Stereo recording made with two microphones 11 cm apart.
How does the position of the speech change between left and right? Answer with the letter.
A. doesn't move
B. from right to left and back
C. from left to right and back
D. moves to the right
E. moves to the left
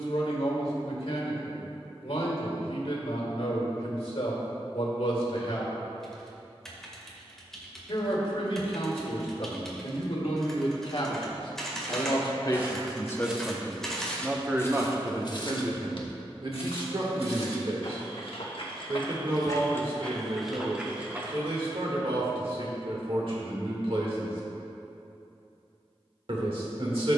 D.